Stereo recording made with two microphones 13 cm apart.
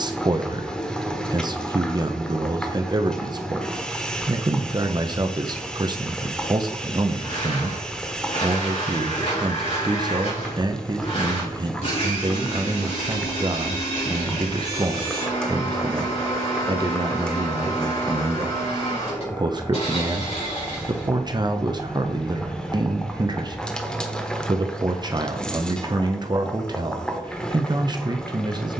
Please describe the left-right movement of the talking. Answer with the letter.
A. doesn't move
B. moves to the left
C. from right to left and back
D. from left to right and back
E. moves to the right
A.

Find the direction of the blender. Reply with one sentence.
In this clip you hear the blender on the left.